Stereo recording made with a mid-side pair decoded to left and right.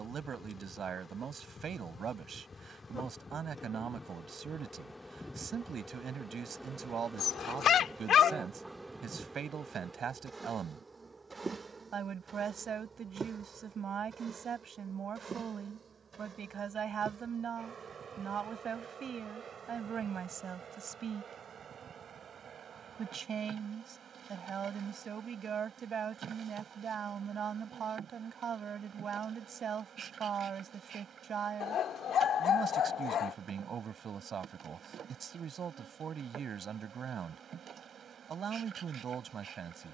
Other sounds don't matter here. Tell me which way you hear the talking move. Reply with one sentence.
You can hear the talking stay put.